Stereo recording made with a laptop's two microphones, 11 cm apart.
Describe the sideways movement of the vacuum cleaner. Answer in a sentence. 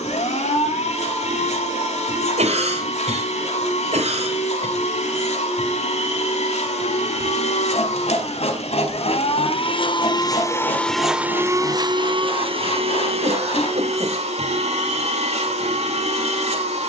You can hear the vacuum cleaner move from left to right.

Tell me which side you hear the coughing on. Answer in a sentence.
You can hear the coughing on the right.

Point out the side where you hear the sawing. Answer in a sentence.
You can hear the sawing on the left.